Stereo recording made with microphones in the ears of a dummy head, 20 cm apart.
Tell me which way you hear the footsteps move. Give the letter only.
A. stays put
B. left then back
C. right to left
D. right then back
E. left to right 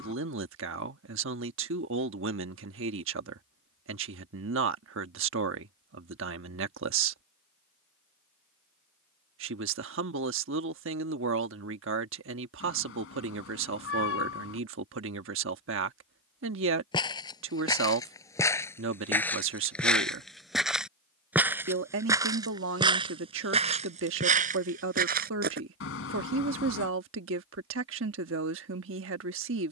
E.